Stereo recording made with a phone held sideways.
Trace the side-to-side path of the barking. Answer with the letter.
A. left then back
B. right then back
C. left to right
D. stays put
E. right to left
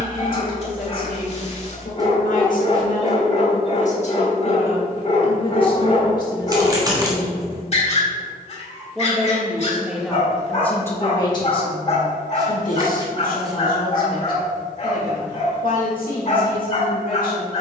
D.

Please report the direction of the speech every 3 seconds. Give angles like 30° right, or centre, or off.
70° left, 50° left, 20° left, 10° left, 70° left, 70° left.